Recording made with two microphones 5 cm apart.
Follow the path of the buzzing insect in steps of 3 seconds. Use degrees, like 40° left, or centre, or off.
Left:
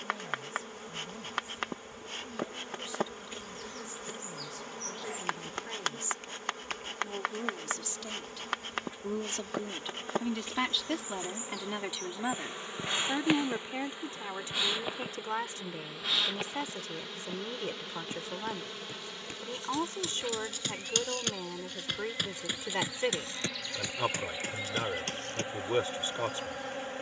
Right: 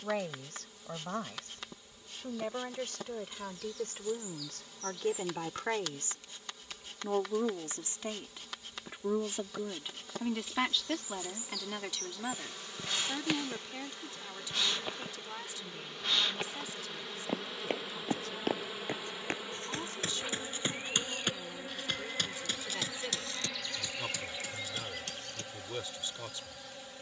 50° left, 50° left, 50° left, 40° left, 20° left, centre, 10° right, 10° right, 30° left.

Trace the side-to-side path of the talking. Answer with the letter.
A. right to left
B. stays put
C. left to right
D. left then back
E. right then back
A.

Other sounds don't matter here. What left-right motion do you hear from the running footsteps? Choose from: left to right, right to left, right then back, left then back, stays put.
right to left.